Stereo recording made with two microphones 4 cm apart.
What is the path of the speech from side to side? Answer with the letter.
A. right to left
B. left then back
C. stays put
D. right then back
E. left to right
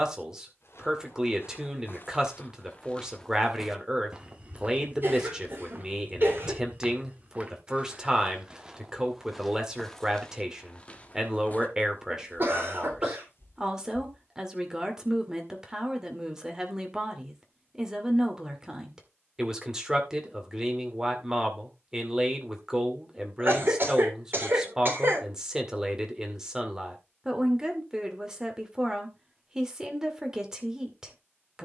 C.